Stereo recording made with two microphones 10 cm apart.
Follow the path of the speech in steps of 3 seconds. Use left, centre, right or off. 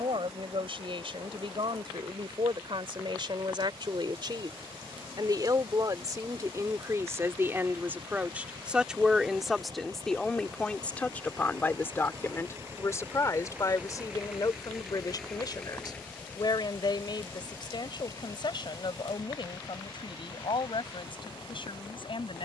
right, right, right, centre, left, left, left, left.